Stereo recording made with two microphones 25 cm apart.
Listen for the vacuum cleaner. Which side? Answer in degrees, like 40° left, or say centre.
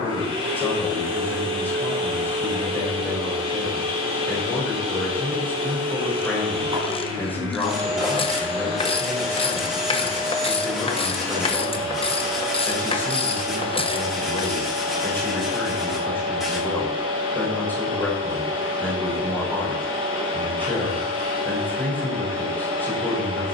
20° right.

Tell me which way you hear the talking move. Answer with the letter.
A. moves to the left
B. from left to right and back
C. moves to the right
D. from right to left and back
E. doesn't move
E.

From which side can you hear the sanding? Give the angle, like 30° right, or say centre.
centre.